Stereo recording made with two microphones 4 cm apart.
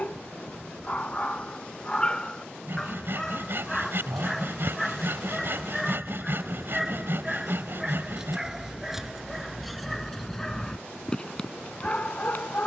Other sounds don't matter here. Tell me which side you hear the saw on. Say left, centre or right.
right.